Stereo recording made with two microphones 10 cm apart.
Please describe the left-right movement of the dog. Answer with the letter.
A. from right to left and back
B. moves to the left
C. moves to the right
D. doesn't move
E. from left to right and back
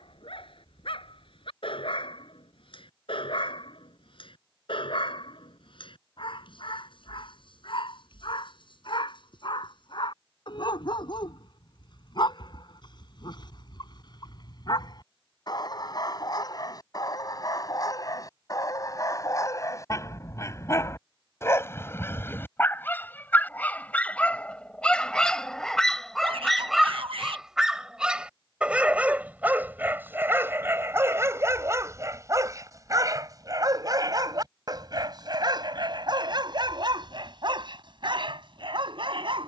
C.